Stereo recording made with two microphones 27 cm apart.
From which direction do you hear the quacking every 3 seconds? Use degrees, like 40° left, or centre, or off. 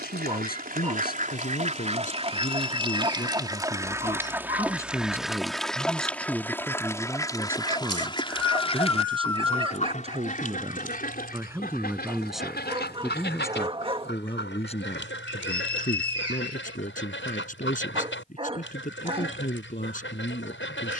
30° right, 10° right, 10° left, 30° left, 40° left, 50° left, 50° left.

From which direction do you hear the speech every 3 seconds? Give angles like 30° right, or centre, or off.
30° left, 10° left, 10° right, 20° right, 10° left, 30° left, 30° left.